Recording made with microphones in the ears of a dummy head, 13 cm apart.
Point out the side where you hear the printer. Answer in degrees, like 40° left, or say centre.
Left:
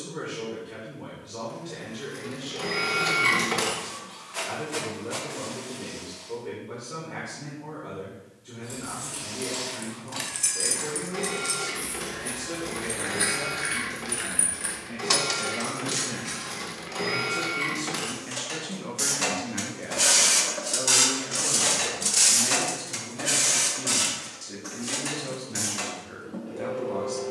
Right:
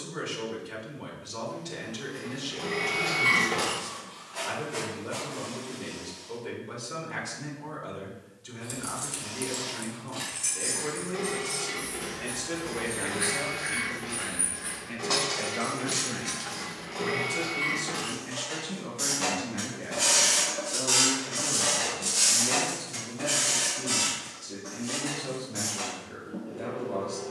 30° left.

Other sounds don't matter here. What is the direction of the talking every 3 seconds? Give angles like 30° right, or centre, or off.
70° right, 70° right, 70° right, 70° right, 50° right, 20° right, 20° left, 40° left, 40° left.